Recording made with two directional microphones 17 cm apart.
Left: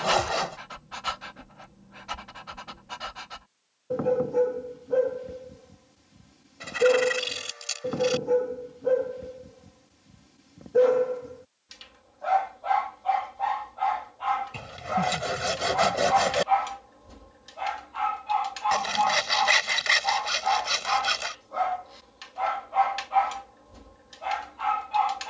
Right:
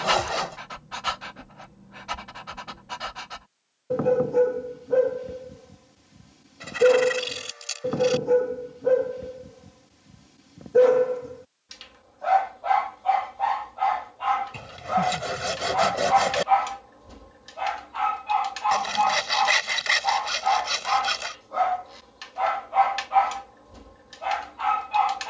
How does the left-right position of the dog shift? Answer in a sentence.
In this clip you hear the dog stay put.